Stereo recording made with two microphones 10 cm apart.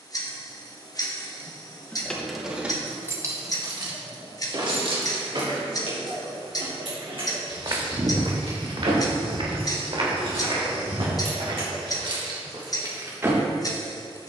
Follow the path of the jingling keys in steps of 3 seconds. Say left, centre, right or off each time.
centre, right, right, right, right.